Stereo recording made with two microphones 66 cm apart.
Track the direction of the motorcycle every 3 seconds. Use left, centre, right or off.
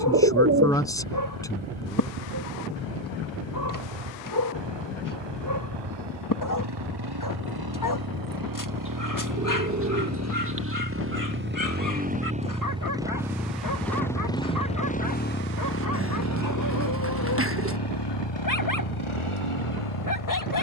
right, right, right, right, centre, left, left.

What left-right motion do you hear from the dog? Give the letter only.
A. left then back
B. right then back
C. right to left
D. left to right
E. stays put
E.